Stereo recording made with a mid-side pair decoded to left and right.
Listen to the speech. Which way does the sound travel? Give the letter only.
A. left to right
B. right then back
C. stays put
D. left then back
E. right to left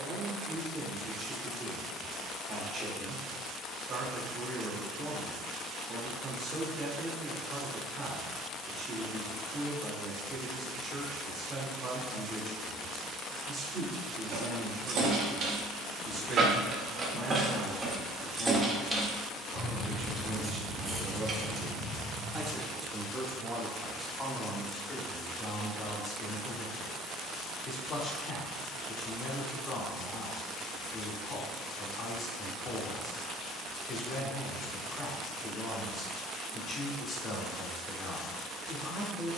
E.